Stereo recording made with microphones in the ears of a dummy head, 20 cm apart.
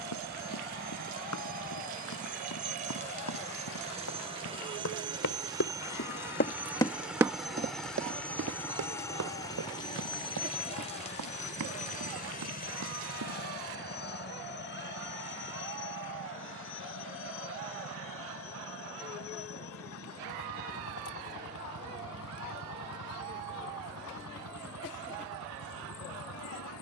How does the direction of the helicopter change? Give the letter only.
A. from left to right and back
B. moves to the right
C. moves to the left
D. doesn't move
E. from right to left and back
C.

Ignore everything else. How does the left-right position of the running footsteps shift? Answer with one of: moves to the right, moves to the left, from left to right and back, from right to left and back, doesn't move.
moves to the right.